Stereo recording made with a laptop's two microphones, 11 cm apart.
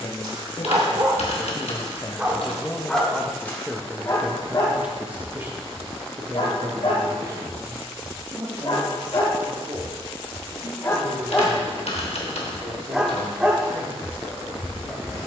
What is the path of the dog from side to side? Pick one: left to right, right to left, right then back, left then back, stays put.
left then back.